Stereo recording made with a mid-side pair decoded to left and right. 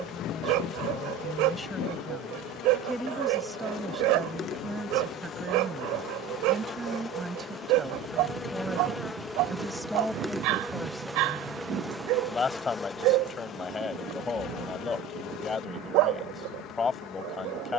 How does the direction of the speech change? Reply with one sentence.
In this clip you hear the speech move from left to right and back again.